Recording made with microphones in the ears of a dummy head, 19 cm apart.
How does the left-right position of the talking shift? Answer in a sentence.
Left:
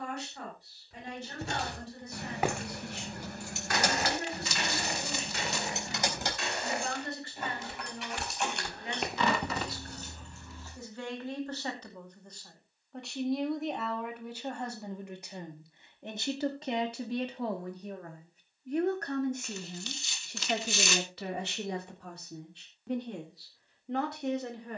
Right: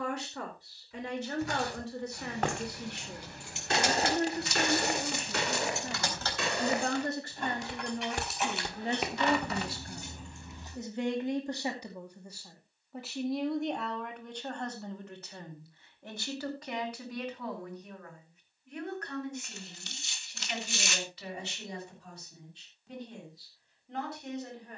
You can hear the talking go from the right side to the left.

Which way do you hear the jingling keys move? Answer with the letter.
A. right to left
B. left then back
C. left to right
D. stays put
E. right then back
C.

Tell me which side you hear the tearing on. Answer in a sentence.
In this clip you hear the tearing on the left.